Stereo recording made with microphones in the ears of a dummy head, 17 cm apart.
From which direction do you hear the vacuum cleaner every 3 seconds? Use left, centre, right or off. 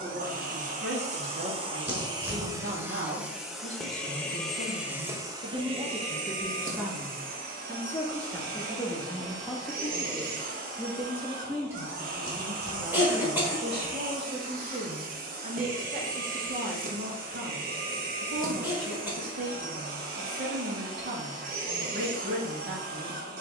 right, centre, right, right, right, right, right, right.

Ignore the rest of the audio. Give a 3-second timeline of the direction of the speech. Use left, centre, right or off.
right, right, centre, centre, right, right, right, right.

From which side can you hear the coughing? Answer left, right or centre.
centre.